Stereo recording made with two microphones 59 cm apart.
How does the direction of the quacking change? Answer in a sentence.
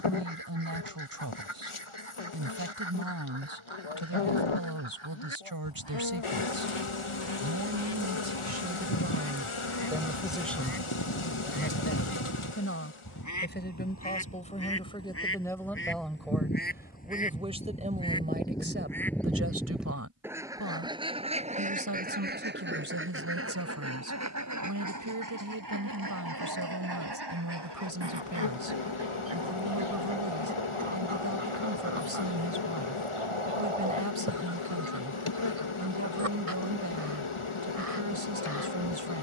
In this clip you hear the quacking move to the right.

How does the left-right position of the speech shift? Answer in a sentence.
You can hear the speech go left and come back.